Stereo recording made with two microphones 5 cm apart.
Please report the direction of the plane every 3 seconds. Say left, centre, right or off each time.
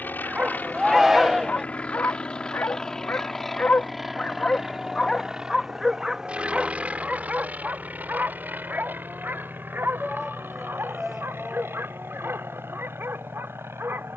left, centre, right, right, right.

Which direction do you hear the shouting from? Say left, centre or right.
centre.